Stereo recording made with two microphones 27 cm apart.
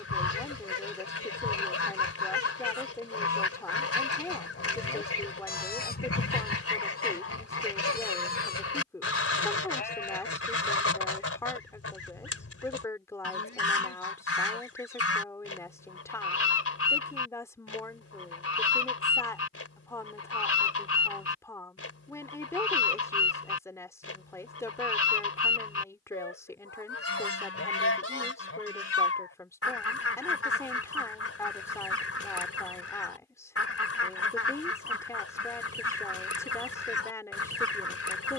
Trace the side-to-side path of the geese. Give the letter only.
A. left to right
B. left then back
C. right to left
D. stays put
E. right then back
D.